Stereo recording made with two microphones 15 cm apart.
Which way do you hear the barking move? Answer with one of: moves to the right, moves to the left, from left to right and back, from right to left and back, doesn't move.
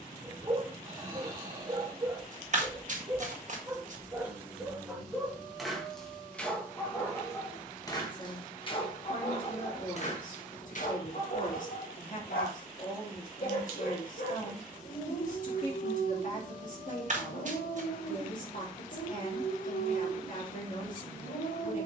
moves to the left.